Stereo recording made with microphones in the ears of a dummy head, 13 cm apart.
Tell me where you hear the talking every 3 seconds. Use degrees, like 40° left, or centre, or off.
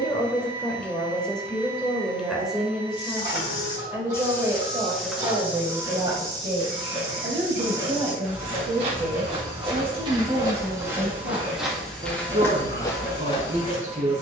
centre, 20° right, 30° right, 40° right, 50° right.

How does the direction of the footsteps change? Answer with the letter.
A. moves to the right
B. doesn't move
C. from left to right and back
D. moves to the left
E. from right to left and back
C.